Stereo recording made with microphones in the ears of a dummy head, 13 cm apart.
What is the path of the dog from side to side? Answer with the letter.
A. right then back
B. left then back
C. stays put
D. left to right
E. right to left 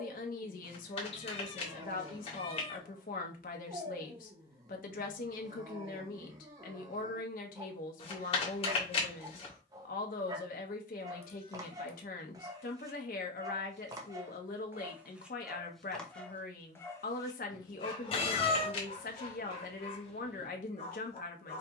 E.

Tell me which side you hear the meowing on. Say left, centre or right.
left.